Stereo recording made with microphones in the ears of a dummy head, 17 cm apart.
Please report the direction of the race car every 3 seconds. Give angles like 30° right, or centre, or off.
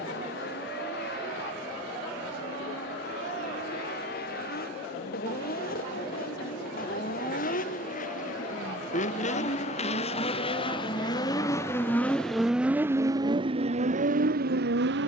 60° left, 50° left, 50° left, 30° left, 30° right.